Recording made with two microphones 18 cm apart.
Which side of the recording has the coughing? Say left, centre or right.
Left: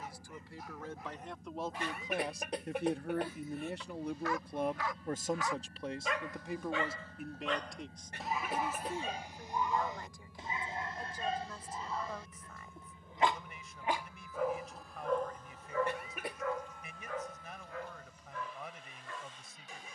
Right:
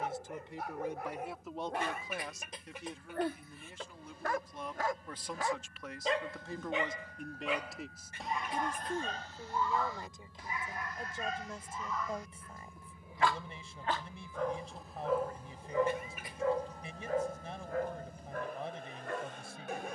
left.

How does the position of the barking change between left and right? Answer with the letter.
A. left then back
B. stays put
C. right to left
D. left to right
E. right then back
A.